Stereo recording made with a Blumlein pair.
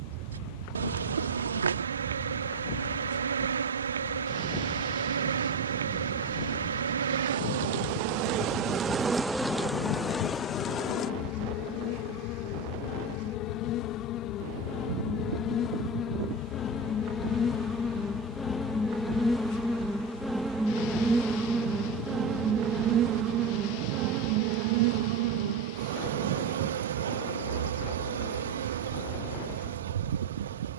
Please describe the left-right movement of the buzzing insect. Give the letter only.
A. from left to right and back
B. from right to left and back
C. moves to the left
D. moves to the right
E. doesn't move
B.